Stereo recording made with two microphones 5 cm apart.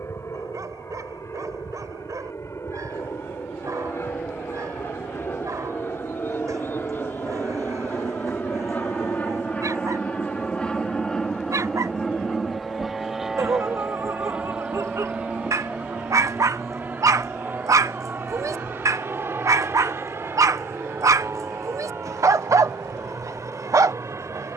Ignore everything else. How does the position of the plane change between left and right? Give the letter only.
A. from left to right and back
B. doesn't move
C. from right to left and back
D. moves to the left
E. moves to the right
E.